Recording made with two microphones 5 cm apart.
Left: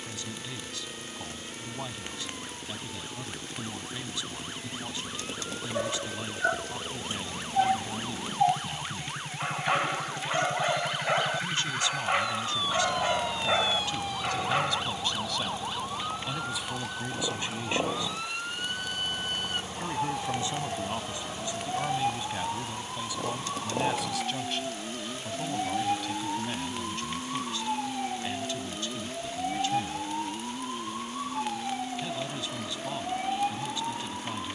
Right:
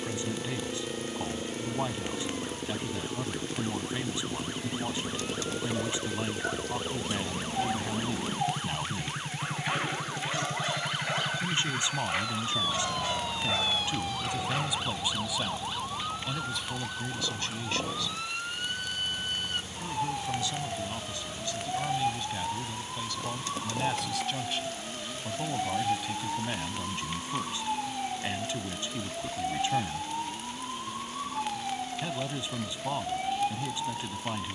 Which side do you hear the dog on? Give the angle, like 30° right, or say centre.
40° left.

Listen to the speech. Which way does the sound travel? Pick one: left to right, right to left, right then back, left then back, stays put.
left then back.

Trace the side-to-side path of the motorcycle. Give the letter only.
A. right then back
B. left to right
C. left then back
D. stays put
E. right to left
E.